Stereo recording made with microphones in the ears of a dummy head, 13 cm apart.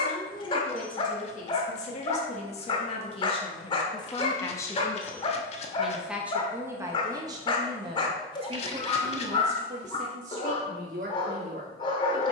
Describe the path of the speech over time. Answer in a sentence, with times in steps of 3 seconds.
In this clip you hear the speech on the left from 0 s and on the right from 6 s.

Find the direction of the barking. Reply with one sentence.
You can hear the barking on the left.